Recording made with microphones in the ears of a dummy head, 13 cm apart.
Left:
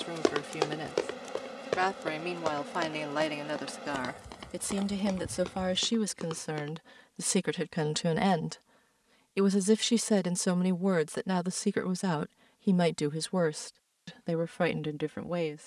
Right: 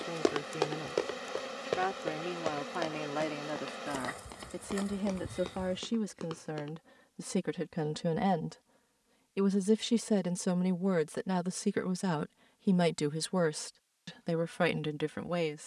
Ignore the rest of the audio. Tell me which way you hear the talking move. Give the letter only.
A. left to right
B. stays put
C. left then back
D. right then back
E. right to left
A.